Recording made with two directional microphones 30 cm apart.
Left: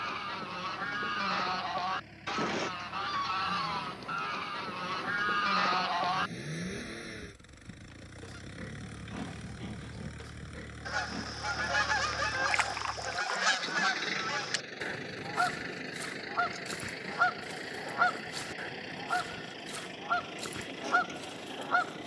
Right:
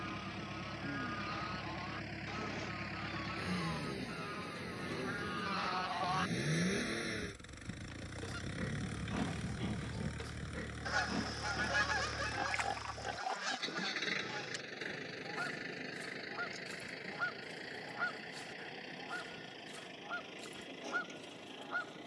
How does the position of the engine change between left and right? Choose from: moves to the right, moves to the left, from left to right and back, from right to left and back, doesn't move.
moves to the left.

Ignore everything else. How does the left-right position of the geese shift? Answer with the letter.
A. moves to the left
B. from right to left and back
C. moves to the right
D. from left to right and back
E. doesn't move
D.